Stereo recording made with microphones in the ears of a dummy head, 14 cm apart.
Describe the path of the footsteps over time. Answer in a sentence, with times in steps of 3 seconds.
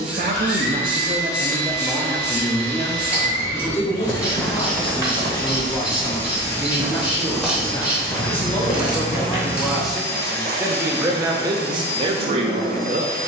In this clip you hear the footsteps not at all from 0 s, in the centre from 3 s, on the left from 9 s and not at all from 12 s.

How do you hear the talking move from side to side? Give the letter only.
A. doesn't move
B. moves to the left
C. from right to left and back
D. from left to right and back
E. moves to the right
C.